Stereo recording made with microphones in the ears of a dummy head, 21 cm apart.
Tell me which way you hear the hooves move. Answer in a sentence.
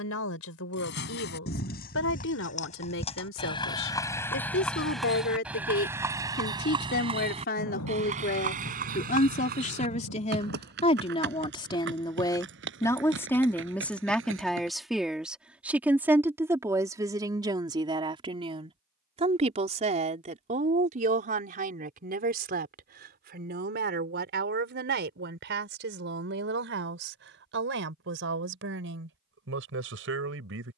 You can hear the hooves travel towards the right.